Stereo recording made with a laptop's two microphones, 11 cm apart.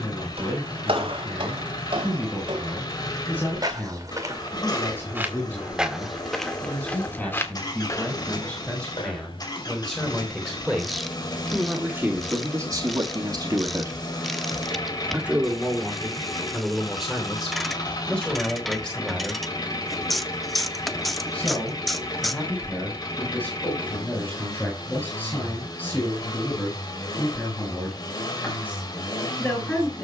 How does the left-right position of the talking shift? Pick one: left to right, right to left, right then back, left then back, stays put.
right then back.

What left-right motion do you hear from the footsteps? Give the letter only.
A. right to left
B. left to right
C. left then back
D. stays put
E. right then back
A.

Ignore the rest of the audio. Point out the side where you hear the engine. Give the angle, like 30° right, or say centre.
40° left.